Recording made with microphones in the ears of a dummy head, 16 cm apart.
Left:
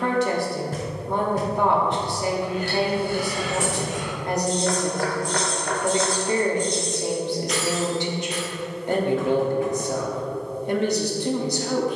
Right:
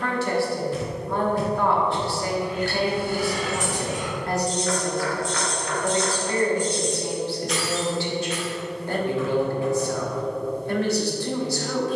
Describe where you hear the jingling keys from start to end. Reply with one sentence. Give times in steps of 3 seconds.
You can hear the jingling keys on the right from 0 s, in the centre from 6 s and not at all from 9 s.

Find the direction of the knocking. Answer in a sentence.
You can hear the knocking on the left.